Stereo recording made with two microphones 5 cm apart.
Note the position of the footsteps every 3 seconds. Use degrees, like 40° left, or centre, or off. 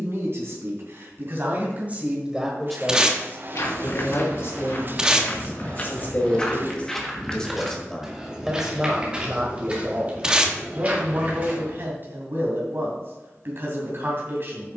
off, 50° left, centre, 30° right, off.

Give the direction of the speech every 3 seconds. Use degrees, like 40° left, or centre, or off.
30° right, 50° left, 10° left, 40° right, 50° right.